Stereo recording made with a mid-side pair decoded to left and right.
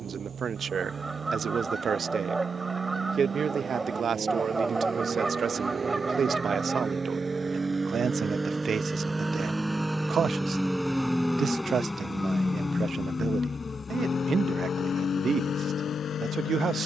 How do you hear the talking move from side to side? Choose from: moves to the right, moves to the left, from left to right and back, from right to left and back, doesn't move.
doesn't move.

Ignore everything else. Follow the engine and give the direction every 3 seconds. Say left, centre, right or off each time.
right, right, right, centre, left, left.